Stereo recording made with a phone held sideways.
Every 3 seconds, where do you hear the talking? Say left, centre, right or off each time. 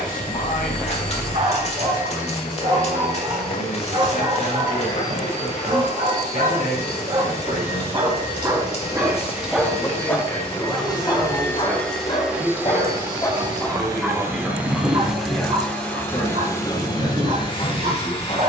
left, left, left, centre, centre, left.